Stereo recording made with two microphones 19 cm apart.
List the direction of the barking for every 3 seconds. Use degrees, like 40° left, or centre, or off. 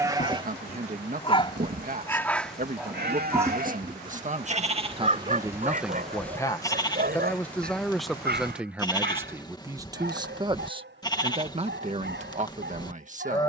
20° left, 30° right, 50° right, 60° right, 70° right.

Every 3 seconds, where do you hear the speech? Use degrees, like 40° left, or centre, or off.
50° right, 30° right, centre, 20° right, 40° right.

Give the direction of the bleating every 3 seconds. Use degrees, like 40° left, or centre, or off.
40° right, 40° right, 20° left, 20° left, 20° left.